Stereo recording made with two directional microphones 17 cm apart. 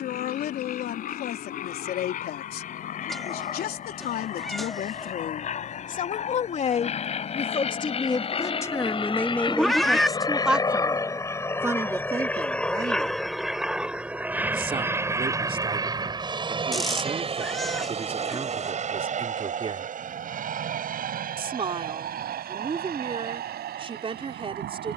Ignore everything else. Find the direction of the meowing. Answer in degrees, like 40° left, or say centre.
centre.